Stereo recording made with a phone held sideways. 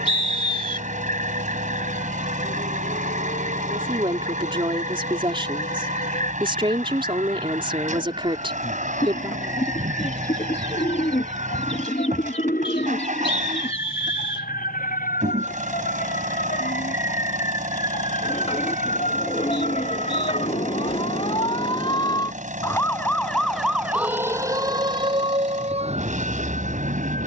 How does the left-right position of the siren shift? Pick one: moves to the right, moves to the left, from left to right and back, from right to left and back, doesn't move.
moves to the right.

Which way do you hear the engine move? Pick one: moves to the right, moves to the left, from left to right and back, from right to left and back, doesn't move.
doesn't move.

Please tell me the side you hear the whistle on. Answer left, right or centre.
left.